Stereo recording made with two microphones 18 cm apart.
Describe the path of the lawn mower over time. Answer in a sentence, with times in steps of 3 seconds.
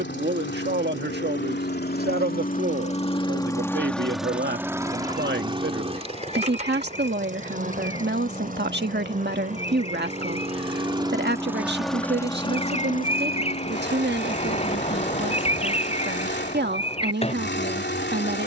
You can hear the lawn mower on the left from 0 s, in the centre from 3 s, on the right from 6 s and on the left from 12 s.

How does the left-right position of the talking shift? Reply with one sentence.
In this clip you hear the talking stay in one place.